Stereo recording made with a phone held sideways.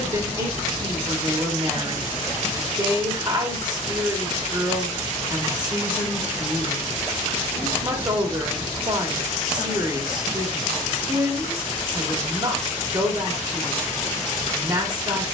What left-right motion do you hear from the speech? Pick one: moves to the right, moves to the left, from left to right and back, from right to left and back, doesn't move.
doesn't move.